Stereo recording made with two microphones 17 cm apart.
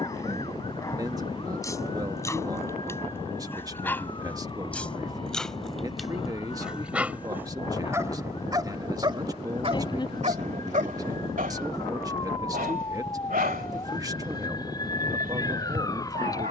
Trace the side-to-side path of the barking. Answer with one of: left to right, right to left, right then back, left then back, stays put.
left to right.